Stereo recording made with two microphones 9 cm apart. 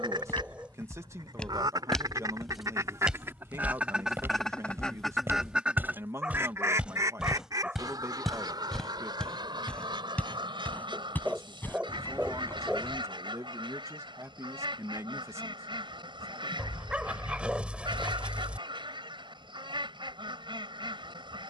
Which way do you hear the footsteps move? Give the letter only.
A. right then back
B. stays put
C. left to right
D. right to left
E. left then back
A.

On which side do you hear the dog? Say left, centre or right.
centre.